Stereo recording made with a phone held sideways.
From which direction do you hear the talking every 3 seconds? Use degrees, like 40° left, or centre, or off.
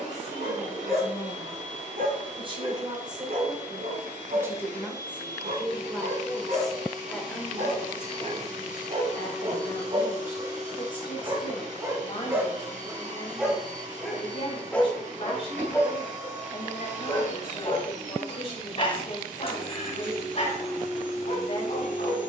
40° right, 10° right, 10° left, 30° left, 40° left, 40° left, 40° left, 40° left.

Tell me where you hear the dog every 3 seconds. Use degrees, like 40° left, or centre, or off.
70° right, 60° right, 50° right, 30° right, centre, 20° left, 40° left, 50° left.